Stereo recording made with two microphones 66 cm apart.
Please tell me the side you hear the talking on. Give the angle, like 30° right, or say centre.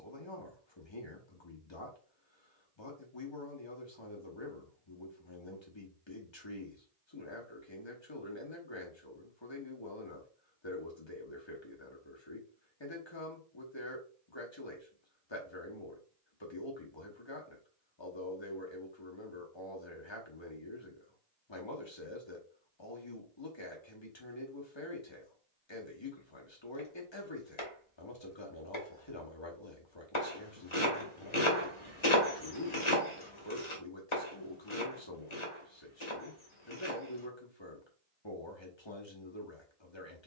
40° left.